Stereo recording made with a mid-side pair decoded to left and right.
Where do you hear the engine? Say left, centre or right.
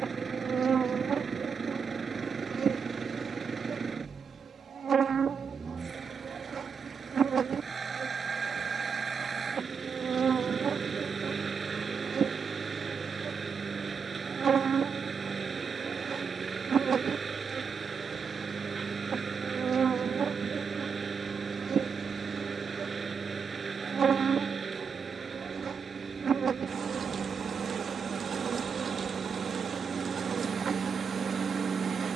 right.